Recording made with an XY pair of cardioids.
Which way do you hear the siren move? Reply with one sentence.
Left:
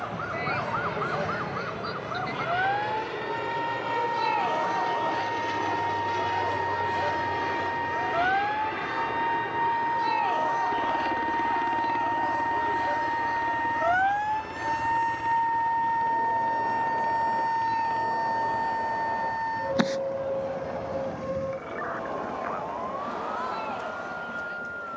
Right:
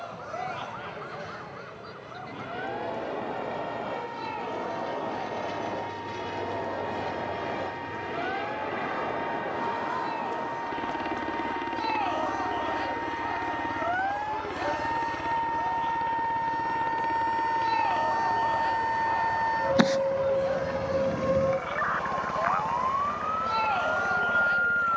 In this clip you hear the siren go from the left side to the right.